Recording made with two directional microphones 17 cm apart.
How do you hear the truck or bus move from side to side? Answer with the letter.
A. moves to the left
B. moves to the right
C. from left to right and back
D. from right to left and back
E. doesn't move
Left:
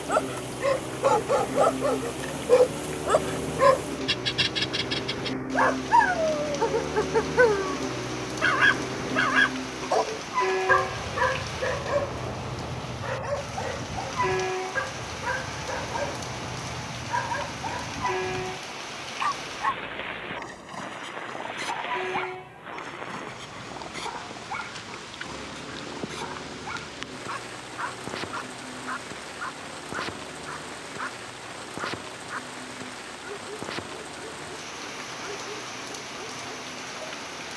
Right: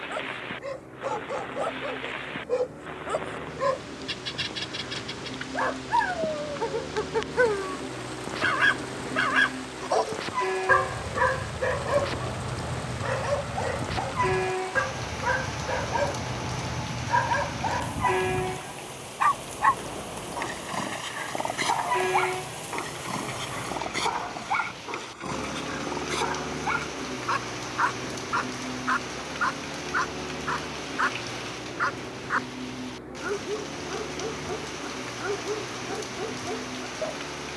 B.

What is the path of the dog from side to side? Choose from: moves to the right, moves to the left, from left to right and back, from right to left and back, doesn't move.
moves to the right.